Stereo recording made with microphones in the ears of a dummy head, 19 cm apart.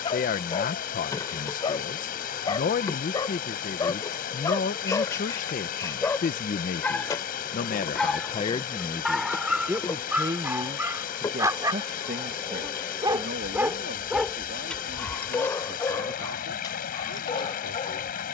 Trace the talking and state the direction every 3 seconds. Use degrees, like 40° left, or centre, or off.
40° left, 40° left, 30° left, 20° right, 50° right, 60° right.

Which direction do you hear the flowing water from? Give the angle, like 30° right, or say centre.
50° left.